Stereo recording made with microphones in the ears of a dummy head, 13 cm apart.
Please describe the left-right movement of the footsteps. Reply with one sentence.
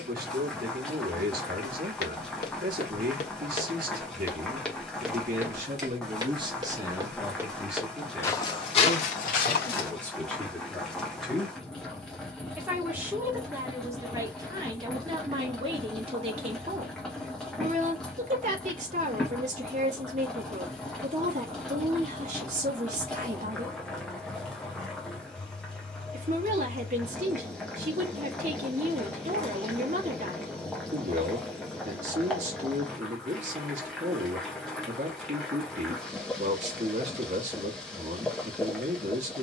In this clip you hear the footsteps move from left to right and back again.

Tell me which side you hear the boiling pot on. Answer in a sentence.
You can hear the boiling pot in the centre.